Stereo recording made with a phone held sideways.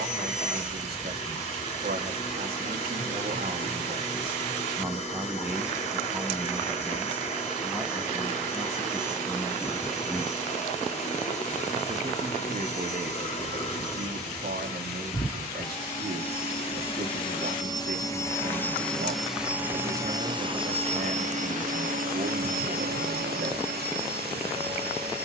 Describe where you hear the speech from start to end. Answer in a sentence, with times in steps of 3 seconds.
In this clip you hear the speech on the right from 0 s, in the centre from 6 s, on the right from 12 s and not at all from 24 s.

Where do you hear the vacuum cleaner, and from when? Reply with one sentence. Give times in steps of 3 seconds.
You can hear the vacuum cleaner on the left from 0 s, in the centre from 18 s and on the right from 21 s.